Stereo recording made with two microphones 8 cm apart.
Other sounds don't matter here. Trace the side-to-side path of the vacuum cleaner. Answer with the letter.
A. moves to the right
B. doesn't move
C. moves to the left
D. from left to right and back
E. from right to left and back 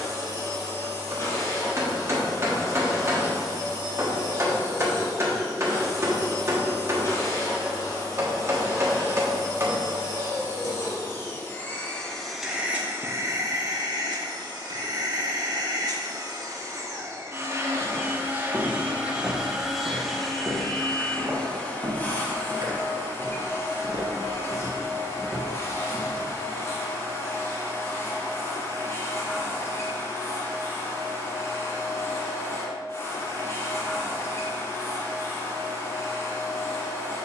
D.